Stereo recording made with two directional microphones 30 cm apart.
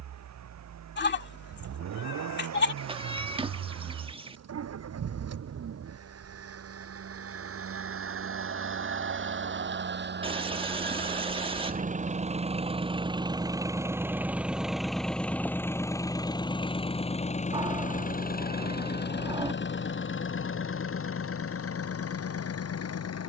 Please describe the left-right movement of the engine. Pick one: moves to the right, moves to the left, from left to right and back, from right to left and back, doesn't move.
moves to the left.